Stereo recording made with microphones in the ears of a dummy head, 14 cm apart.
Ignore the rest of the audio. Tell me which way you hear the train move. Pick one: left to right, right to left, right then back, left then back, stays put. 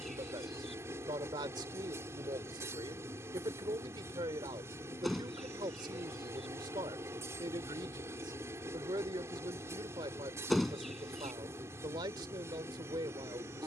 stays put.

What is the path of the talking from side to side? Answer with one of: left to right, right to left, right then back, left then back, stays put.
stays put.